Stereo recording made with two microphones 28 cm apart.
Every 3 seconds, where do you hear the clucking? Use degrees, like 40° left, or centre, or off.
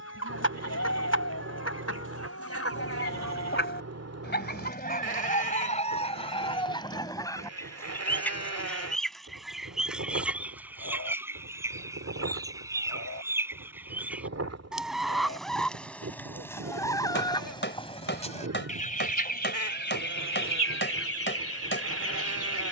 60° left, 30° left, 10° left, 10° right, 10° right, 10° left, 40° left, 50° left.